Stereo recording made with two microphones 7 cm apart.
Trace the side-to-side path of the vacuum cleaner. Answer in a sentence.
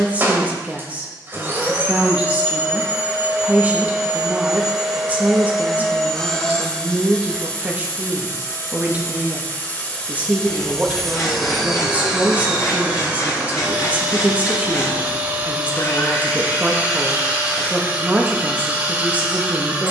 In this clip you hear the vacuum cleaner go left and come back.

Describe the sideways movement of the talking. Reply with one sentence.
You can hear the talking stay put.